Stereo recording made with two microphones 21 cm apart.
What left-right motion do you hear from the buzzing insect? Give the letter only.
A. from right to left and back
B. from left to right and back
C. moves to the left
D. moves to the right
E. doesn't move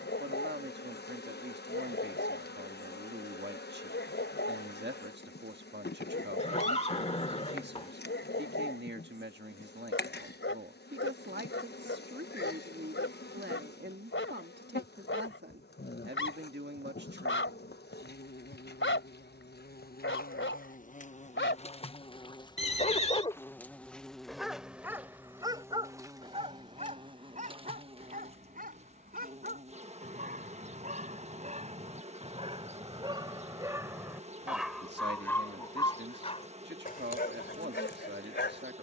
D.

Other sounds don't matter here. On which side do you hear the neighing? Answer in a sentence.
You can hear the neighing on the left.